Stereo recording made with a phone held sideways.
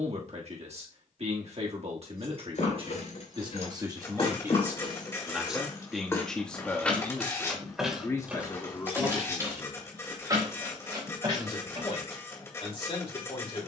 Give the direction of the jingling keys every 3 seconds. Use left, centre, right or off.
left, left, centre, right, off.